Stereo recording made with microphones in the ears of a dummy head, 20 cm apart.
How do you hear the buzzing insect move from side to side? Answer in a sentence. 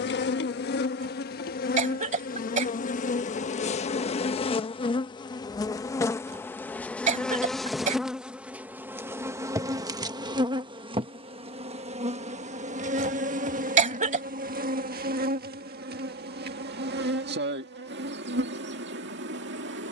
In this clip you hear the buzzing insect move to the right.